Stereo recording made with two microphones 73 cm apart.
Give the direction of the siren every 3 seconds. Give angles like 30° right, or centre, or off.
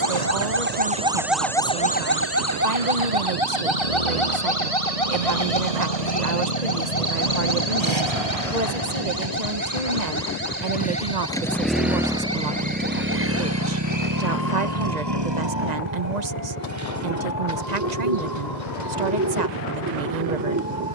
centre, 50° left, 60° left, 70° left, 70° left, 80° left, 80° left.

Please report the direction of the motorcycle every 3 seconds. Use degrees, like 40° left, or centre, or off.
70° left, 60° left, 40° left, 20° left, 20° right, 40° right, 60° right.